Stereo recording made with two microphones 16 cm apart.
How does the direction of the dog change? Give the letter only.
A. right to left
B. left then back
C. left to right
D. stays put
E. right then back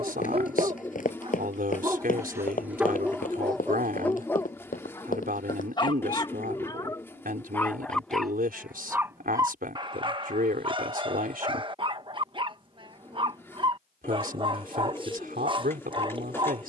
B.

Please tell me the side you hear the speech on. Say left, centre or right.
right.